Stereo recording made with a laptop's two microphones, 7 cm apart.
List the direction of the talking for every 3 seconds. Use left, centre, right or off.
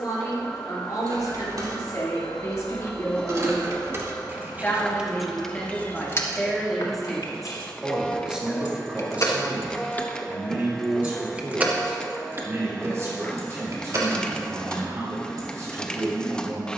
left, left, centre, right, right, right.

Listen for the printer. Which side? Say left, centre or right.
centre.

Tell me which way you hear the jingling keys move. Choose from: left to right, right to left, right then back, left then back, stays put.
left then back.